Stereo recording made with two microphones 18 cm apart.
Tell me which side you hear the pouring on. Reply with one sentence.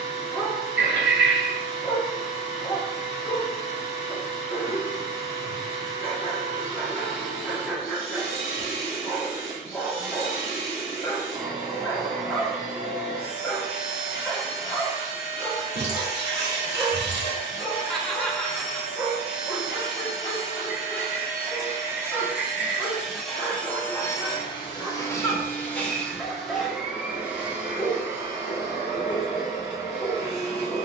In this clip you hear the pouring on the right.